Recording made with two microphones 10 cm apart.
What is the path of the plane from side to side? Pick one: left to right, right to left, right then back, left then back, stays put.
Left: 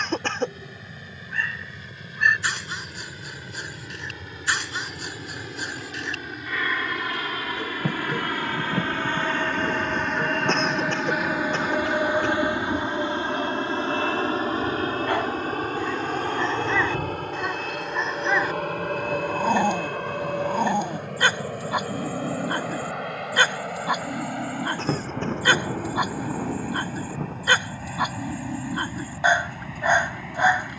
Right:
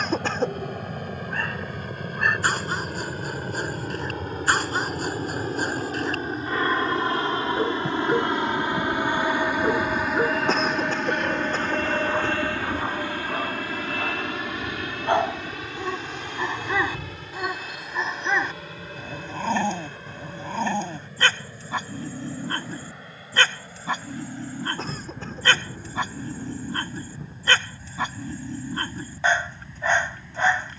right to left.